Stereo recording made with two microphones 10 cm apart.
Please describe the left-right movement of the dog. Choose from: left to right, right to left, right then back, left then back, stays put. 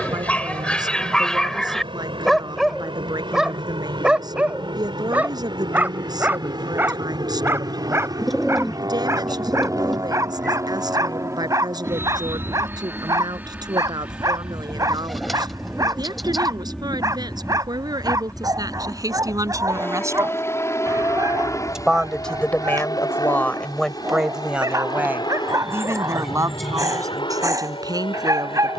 left to right.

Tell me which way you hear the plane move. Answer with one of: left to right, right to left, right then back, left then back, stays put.
right to left.